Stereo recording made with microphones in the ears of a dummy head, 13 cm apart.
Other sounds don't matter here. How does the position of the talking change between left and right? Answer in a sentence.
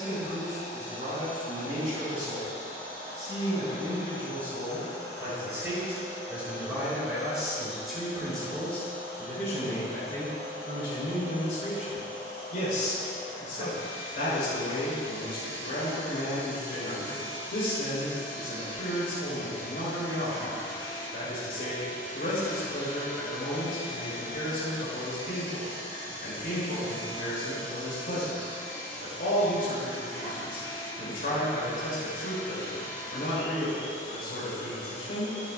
In this clip you hear the talking go from the right side to the left.